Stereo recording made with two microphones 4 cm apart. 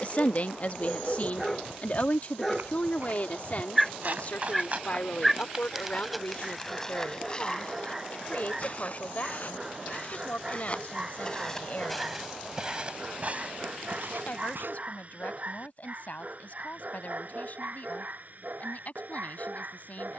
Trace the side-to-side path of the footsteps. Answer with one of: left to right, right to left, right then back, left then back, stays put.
left then back.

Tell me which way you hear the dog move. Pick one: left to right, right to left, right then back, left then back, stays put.
left to right.